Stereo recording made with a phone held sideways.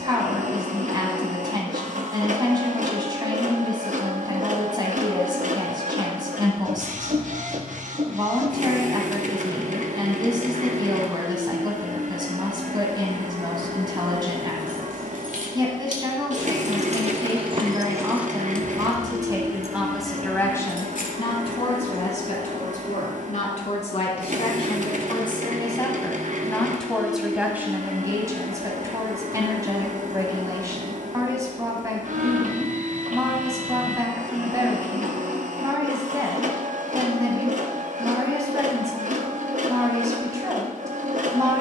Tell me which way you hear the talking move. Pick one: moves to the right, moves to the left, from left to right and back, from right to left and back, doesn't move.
from right to left and back.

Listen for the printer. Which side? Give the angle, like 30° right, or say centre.
60° right.